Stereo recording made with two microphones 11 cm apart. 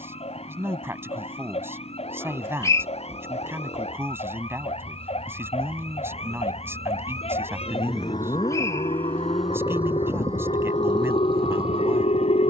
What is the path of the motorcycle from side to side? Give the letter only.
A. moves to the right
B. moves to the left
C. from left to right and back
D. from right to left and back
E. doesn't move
A.